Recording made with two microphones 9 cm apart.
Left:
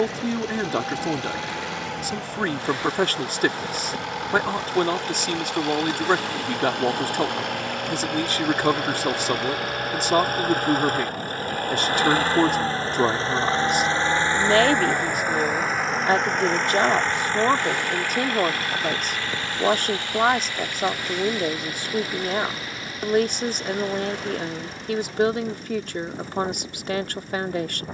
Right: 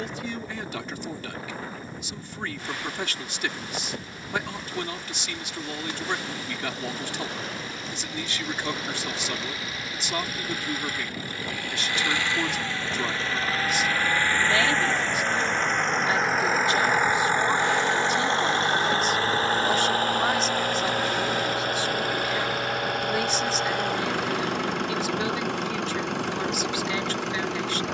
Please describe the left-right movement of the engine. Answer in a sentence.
In this clip you hear the engine travel towards the right.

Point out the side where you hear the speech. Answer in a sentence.
You can hear the speech on the left.